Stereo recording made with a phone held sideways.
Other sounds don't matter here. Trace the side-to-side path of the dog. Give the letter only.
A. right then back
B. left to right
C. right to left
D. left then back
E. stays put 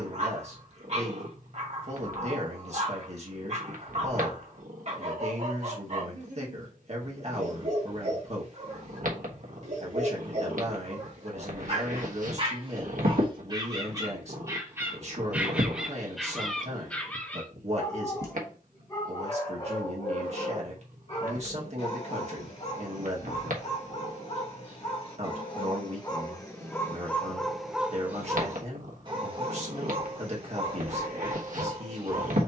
D.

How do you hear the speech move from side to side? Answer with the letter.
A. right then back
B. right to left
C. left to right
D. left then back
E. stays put
E.